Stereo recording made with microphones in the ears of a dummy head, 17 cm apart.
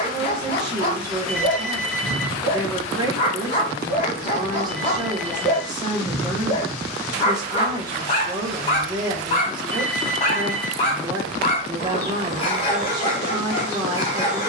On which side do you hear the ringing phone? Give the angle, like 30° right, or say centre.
centre.